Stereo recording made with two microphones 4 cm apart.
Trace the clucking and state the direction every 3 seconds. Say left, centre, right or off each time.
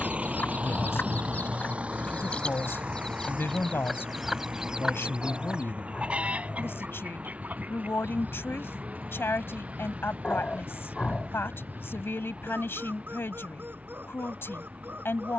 left, centre, right, right, right.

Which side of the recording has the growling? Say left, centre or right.
left.